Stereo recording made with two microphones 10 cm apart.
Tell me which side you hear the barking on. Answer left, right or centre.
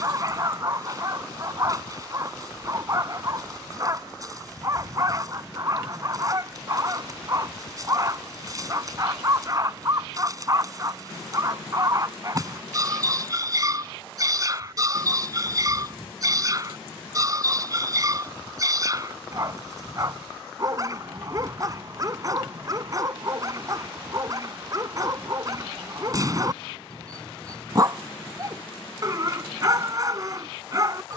right.